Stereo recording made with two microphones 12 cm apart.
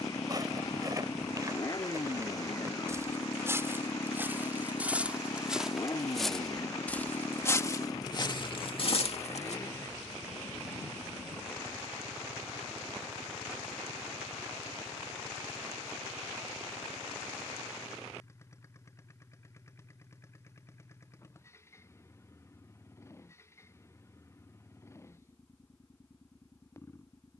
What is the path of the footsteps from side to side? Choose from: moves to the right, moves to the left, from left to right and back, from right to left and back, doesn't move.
moves to the left.